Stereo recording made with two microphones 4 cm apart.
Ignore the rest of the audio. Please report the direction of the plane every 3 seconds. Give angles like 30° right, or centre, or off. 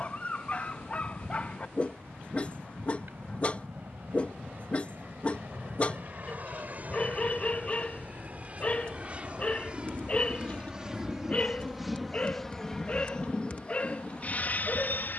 50° right, 50° right, 40° right, 20° right, 20° left.